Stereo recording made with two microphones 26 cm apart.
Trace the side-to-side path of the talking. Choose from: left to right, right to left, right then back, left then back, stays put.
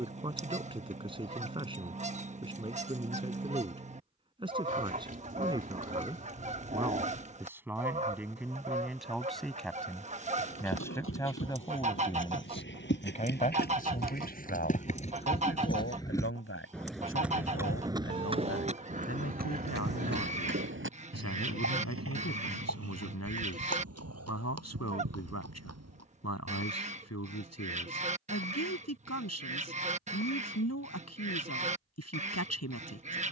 right to left.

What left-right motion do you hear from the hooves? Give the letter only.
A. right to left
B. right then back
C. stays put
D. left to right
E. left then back
D.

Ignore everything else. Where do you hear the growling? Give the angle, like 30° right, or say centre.
30° right.